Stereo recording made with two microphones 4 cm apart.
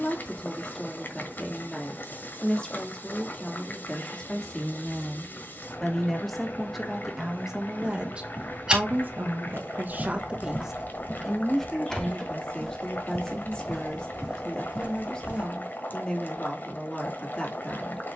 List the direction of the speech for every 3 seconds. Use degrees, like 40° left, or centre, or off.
20° left, 20° left, 10° right, 30° right, 20° left, 20° left.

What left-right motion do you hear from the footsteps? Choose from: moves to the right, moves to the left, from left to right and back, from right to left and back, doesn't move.
from right to left and back.